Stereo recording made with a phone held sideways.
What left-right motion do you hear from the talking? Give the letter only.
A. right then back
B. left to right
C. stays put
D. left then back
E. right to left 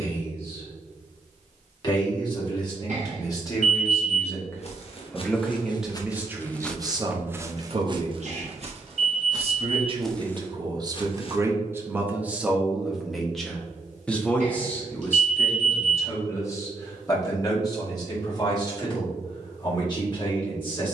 A.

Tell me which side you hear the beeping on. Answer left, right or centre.
right.